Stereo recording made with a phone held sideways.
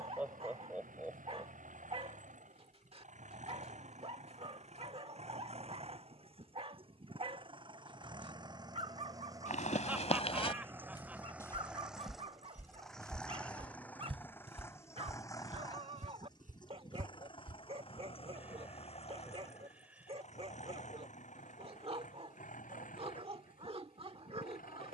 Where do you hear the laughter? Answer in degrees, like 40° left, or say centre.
10° right.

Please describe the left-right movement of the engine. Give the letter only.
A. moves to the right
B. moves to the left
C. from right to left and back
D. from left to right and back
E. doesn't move
B.